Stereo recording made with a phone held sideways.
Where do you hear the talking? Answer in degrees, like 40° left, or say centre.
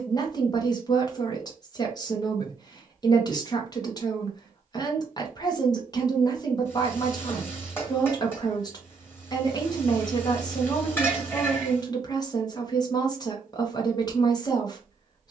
30° left.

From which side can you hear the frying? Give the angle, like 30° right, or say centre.
10° left.